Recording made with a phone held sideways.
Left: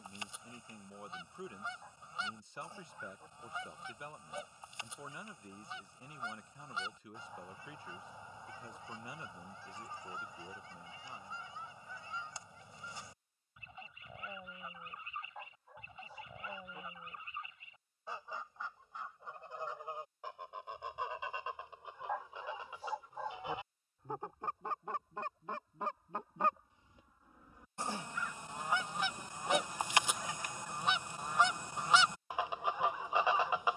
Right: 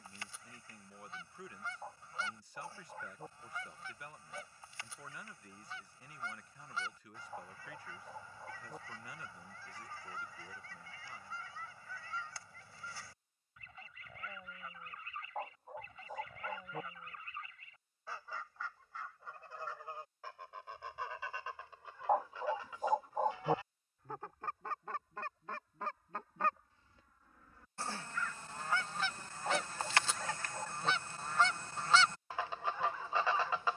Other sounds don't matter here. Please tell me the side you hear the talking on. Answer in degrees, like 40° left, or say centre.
20° left.